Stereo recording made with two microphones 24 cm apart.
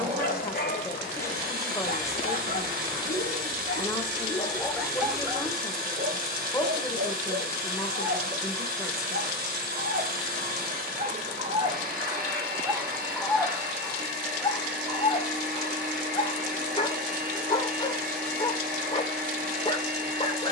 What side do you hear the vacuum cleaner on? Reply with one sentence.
You can hear the vacuum cleaner on the right.